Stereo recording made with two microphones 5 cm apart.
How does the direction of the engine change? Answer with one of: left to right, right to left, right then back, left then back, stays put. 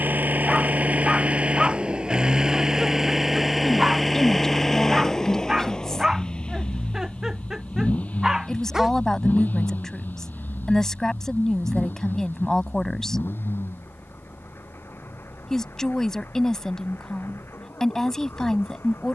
right to left.